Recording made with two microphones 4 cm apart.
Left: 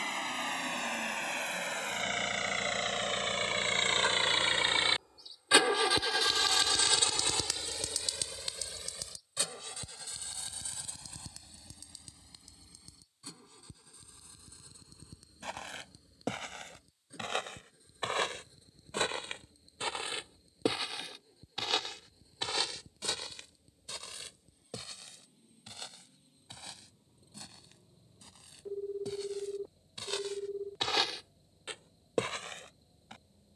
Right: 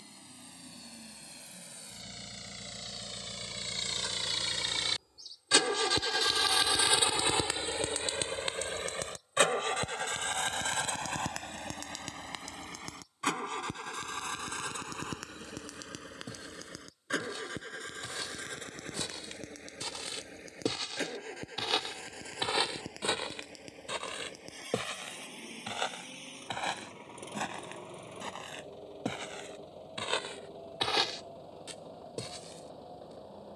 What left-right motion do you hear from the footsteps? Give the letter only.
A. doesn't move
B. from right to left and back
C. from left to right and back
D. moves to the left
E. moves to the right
C.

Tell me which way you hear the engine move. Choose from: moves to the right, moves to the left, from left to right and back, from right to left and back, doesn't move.
moves to the right.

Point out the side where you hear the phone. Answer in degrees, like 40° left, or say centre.
50° left.